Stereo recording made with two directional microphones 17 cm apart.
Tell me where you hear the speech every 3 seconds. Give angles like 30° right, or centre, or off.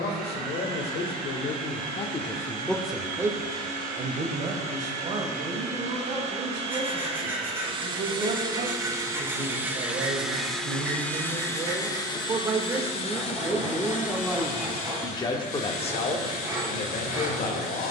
40° left, 40° right, 50° right, 40° right, 10° right, 40° left.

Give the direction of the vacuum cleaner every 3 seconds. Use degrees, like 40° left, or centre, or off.
60° right, 50° right, 30° right, centre, 40° left, 60° left.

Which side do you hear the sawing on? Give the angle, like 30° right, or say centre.
10° right.